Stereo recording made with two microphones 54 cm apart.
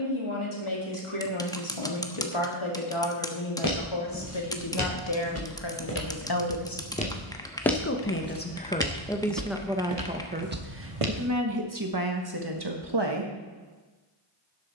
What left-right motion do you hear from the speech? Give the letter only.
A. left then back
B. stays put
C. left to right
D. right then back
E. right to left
C.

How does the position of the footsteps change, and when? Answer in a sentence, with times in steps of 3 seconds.
You can hear the footsteps not at all from 0 s, on the left from 3 s, in the centre from 6 s, on the right from 9 s and not at all from 12 s.